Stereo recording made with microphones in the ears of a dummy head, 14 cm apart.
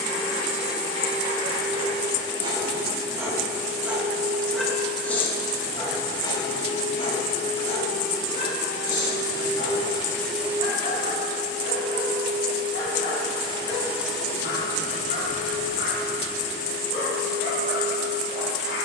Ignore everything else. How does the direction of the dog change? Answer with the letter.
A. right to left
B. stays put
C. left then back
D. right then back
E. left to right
A.